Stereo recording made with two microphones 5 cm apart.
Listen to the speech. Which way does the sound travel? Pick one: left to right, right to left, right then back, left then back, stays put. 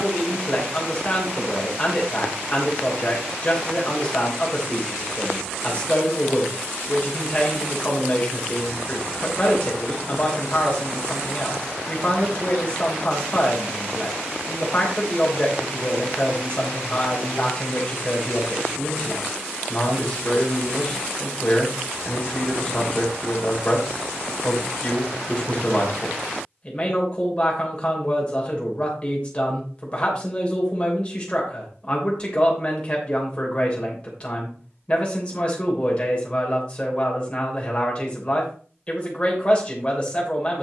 stays put.